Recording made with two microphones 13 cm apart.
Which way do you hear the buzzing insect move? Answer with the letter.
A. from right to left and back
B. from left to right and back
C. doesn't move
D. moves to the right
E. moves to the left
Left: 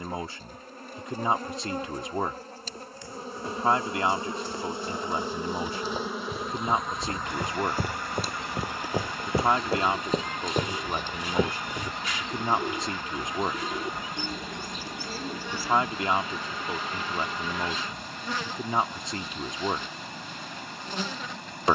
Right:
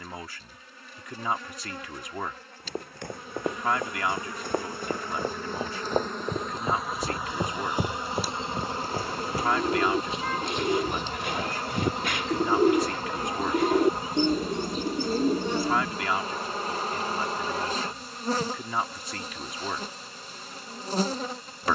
D.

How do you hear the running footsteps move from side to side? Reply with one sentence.
In this clip you hear the running footsteps move from right to left.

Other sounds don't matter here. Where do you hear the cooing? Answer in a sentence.
You can hear the cooing on the right.